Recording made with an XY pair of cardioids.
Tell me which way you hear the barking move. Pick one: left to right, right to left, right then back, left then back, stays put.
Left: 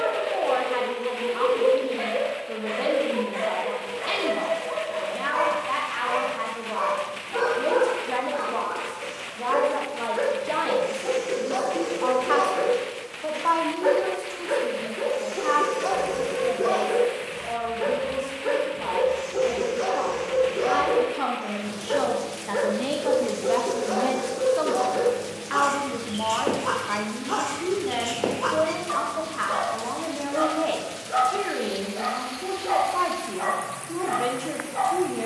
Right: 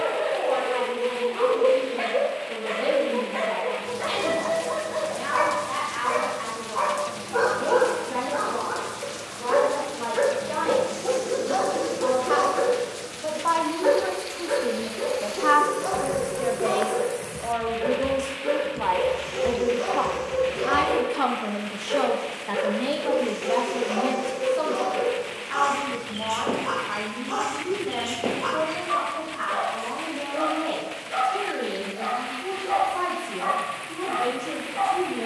right to left.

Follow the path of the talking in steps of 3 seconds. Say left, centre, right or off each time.
left, left, left, left, centre, right, right, centre, left, left, left, left.